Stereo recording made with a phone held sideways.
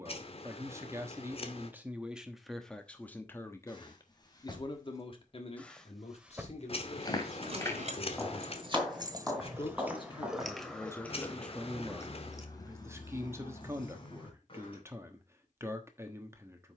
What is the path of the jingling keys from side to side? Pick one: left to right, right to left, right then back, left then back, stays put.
right then back.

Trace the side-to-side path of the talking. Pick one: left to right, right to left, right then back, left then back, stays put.
left then back.